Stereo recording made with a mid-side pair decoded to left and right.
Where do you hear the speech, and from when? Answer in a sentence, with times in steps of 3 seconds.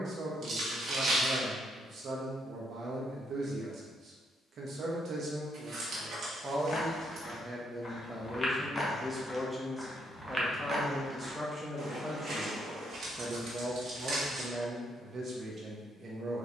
In this clip you hear the speech on the right from 0 s, in the centre from 9 s and on the right from 12 s.